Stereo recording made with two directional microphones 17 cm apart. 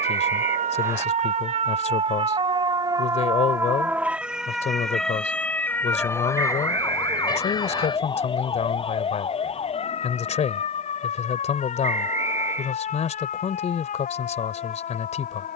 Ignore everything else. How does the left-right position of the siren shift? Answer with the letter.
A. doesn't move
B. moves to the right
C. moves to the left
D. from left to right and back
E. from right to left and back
C.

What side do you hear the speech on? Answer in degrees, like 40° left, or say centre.
40° left.